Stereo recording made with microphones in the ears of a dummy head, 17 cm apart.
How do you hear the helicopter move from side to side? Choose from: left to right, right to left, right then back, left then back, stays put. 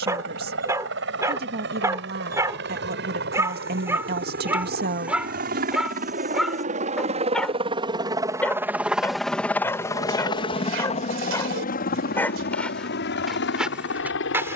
right to left.